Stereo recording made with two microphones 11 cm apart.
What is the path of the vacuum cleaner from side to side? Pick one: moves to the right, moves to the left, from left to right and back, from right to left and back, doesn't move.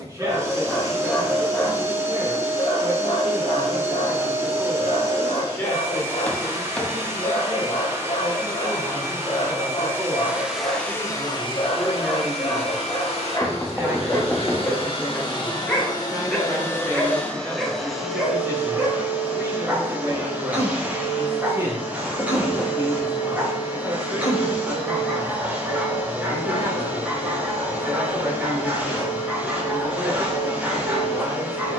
from right to left and back.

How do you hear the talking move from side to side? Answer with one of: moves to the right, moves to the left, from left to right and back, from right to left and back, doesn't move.
from right to left and back.